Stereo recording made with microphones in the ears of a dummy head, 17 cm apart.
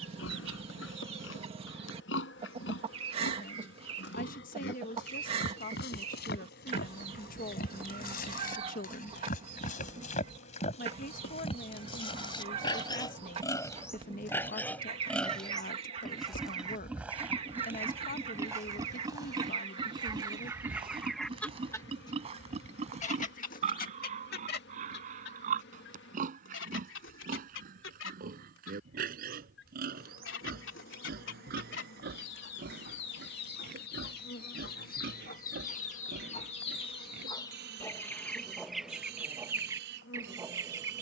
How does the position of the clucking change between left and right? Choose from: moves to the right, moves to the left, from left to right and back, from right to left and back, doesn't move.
from right to left and back.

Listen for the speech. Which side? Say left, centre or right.
left.